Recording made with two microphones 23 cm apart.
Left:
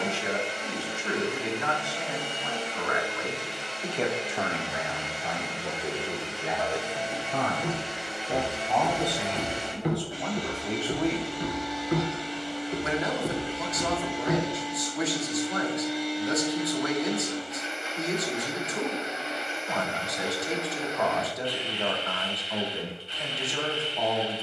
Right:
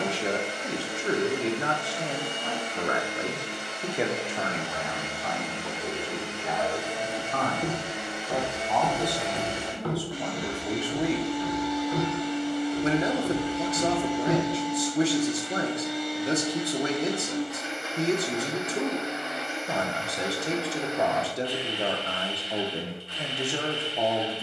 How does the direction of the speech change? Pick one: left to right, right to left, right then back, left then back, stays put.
left then back.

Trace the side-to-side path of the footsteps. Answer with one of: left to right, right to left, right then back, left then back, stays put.
left then back.